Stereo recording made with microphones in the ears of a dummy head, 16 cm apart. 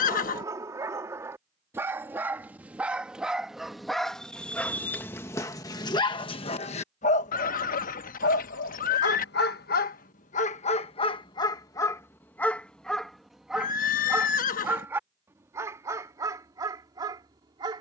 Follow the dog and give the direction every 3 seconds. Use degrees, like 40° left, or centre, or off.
10° right, 10° left, 50° left, 40° left, centre, 20° right.